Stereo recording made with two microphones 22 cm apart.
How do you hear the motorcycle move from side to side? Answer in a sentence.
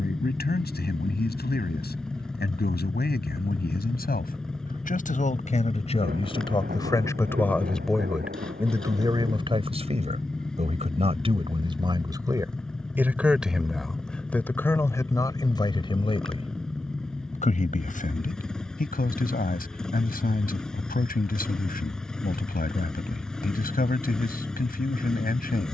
You can hear the motorcycle stay in one place.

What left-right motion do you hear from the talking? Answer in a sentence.
You can hear the talking move from left to right and back again.